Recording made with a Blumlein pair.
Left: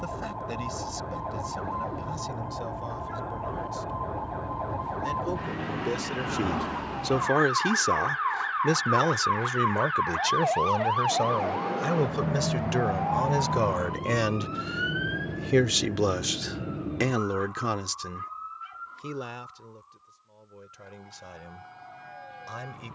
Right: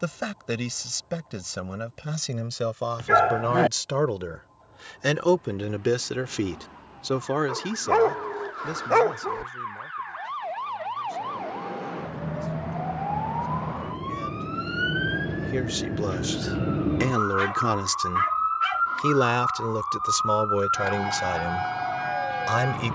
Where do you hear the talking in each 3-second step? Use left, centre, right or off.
right, right, centre, left, left, centre, right, right.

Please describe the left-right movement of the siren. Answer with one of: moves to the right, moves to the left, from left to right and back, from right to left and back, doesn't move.
moves to the right.